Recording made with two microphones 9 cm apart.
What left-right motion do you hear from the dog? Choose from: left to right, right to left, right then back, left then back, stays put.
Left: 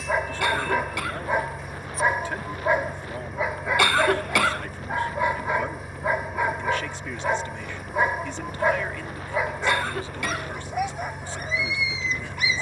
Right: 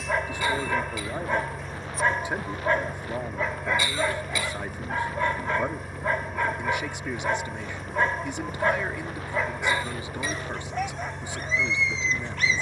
stays put.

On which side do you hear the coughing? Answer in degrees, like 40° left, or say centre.
70° left.